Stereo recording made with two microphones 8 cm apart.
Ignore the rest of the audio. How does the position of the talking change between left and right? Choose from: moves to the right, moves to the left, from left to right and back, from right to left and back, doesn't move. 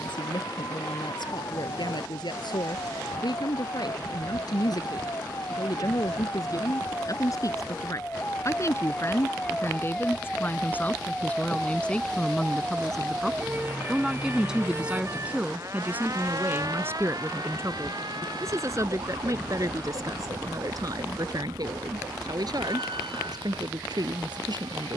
moves to the right.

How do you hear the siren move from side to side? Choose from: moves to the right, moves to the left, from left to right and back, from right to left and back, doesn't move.
moves to the right.